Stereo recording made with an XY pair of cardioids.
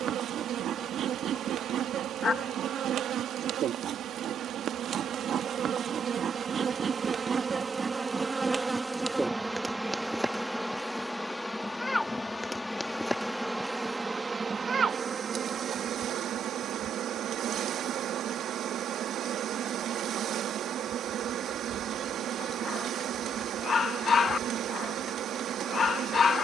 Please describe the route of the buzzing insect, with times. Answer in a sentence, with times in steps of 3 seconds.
In this clip you hear the buzzing insect on the right from 0 s, in the centre from 9 s and on the right from 15 s.